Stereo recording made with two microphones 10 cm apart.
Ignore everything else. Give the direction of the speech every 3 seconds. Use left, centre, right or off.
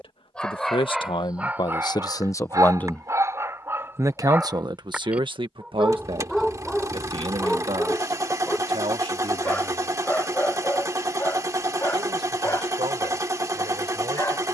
left, right, right, right, right.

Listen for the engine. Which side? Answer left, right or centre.
right.